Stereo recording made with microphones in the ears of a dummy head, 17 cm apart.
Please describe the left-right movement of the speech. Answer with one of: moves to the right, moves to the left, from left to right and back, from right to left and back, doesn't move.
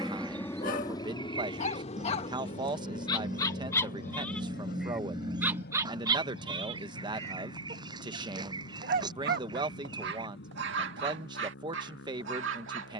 doesn't move.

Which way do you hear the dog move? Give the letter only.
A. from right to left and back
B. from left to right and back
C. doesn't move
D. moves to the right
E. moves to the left
D.